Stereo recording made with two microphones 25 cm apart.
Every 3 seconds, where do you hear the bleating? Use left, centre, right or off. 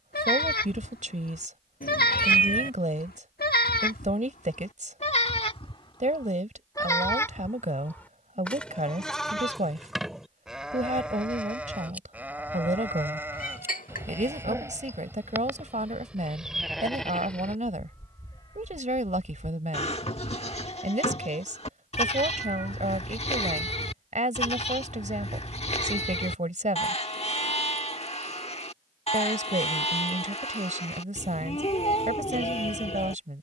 left, left, centre, centre, centre, centre, left, left, left, left, left.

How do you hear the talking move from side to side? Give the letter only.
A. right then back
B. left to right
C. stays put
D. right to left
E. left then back
C.